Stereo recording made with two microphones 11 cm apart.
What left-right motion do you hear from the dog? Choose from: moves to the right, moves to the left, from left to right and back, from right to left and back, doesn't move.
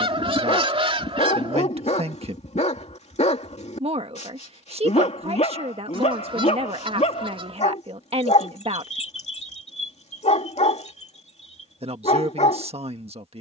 doesn't move.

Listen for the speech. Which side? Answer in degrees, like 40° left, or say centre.
60° right.